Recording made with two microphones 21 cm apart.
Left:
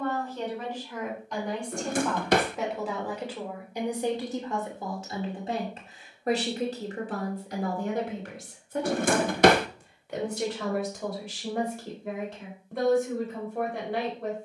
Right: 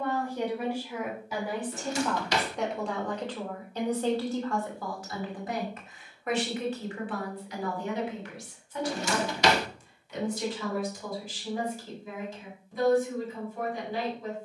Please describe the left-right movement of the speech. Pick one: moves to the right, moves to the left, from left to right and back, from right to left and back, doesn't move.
moves to the left.